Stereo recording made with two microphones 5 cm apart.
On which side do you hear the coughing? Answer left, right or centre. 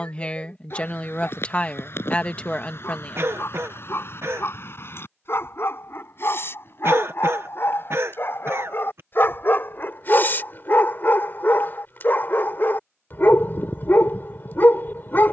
right.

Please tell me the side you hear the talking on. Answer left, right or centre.
left.